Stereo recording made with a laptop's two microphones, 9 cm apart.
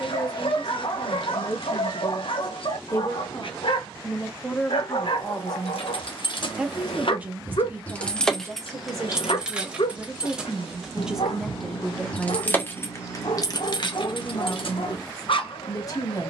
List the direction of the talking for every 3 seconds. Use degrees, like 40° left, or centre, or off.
40° left, 20° left, 20° right, 10° right, 30° left, 40° left.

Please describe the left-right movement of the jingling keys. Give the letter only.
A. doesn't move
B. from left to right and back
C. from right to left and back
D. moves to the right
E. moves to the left
B.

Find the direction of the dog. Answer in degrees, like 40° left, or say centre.
70° left.